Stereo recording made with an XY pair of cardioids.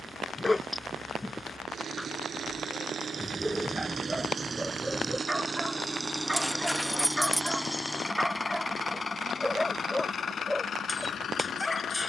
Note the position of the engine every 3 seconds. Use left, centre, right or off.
right, right, centre, left.